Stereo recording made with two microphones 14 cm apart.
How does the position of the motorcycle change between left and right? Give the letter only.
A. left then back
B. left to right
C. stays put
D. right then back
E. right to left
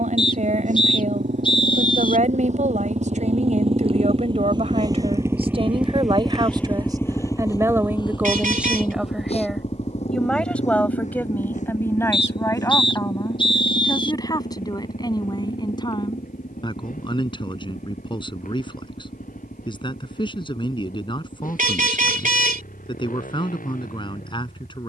E.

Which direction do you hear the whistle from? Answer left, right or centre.
left.